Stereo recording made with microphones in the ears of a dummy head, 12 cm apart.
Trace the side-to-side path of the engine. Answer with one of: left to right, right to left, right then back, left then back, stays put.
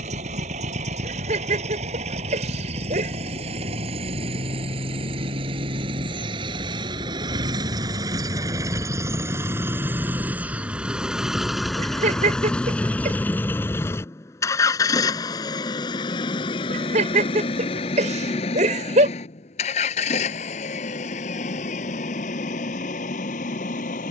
right to left.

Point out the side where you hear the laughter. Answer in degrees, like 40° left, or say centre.
60° right.